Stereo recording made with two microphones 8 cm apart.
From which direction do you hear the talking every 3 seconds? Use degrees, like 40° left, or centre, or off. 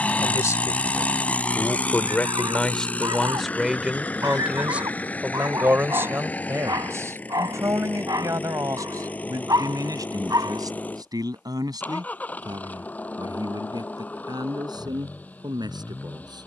20° left, 10° right, 40° right, 50° right, 60° right, 60° right.